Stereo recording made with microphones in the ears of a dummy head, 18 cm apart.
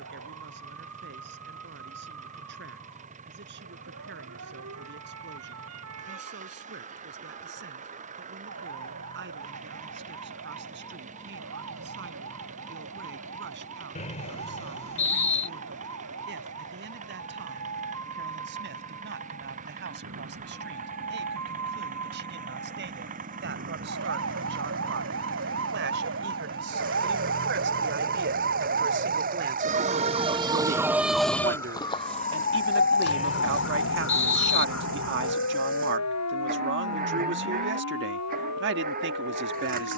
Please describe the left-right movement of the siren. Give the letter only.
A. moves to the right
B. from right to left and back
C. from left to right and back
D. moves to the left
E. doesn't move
D.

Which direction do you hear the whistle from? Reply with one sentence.
You can hear the whistle on the left.